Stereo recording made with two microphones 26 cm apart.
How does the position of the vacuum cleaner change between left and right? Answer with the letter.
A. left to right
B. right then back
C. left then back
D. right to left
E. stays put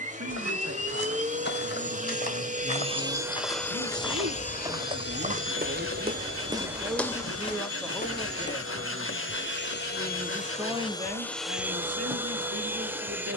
C.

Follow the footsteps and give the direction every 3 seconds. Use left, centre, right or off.
left, centre, centre, off, off.